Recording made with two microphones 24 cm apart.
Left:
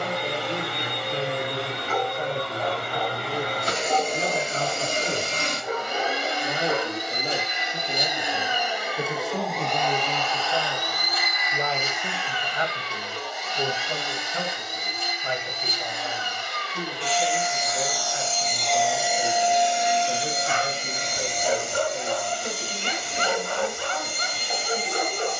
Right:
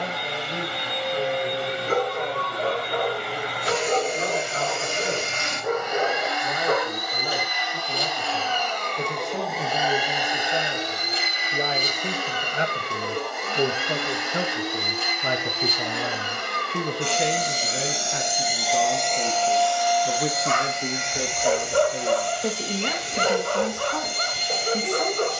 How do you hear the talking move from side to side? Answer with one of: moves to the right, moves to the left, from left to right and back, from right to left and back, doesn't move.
moves to the right.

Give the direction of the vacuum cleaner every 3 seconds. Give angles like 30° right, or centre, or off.
50° left, 40° left, 20° left, 20° right, 60° right, 60° right, 10° left, 50° left, 50° left.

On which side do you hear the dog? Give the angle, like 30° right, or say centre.
50° right.